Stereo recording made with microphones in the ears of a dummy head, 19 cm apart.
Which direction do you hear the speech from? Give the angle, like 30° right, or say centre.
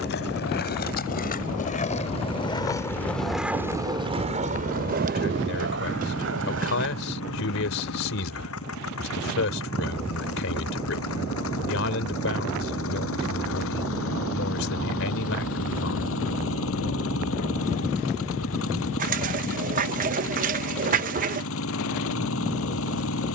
60° left.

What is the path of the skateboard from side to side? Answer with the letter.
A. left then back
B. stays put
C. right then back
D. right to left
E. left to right
E.